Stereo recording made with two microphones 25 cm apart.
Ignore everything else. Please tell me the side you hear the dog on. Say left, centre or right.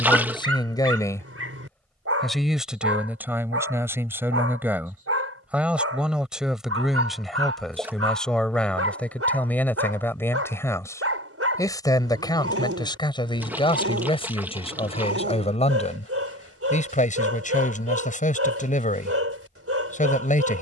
right.